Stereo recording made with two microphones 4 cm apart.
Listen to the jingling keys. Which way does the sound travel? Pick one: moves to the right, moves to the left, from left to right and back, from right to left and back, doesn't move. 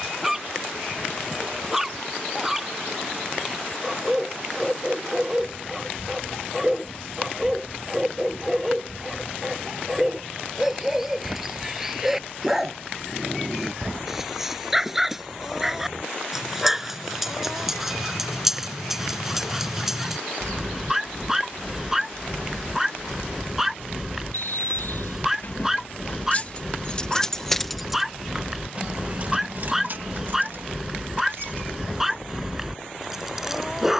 moves to the right.